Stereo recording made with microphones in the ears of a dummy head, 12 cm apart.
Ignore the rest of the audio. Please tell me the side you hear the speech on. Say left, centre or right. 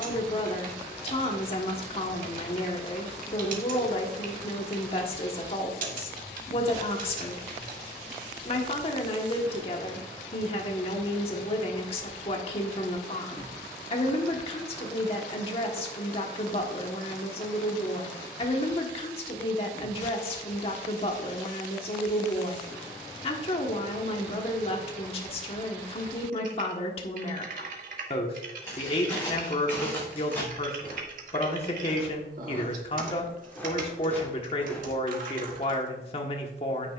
left.